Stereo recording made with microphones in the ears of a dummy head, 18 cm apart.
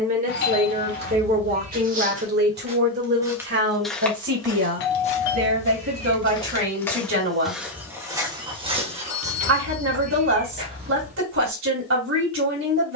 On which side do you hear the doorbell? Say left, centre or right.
left.